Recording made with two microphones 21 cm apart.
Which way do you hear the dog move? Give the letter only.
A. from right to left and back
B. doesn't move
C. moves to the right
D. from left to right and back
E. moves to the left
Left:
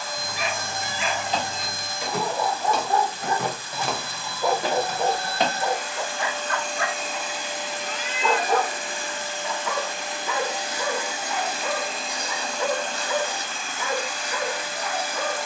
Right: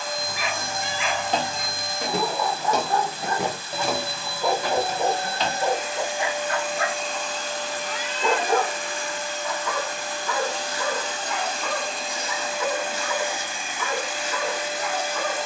D.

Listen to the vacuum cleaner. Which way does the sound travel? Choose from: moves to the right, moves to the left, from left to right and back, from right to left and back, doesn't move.
from right to left and back.